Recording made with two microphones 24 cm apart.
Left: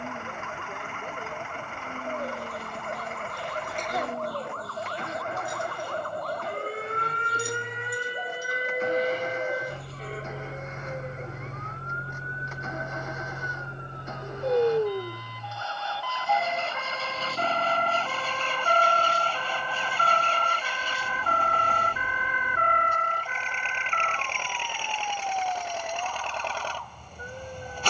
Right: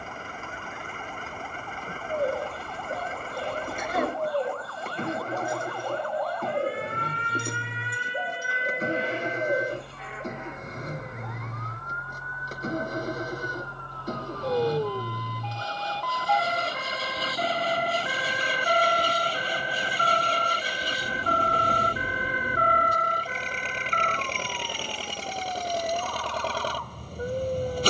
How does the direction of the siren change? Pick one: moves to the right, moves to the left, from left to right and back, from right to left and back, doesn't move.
moves to the right.